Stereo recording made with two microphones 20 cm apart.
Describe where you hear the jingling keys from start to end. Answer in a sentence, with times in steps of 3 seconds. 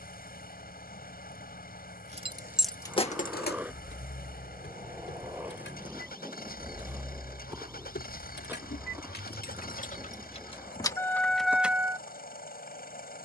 You can hear the jingling keys in the centre from 0 s, on the left from 3 s and not at all from 12 s.